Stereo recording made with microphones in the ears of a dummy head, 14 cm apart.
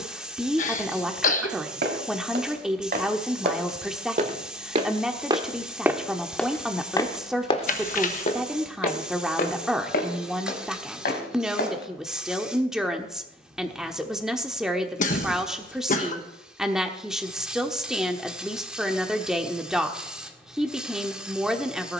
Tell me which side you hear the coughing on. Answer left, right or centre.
left.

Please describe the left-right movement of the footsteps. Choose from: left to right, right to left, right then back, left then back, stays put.
right to left.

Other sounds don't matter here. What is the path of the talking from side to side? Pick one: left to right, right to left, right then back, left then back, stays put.
stays put.